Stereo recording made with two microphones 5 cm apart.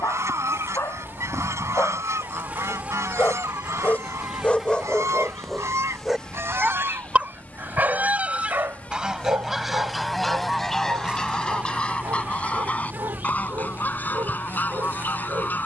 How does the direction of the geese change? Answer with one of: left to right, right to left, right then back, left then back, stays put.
right to left.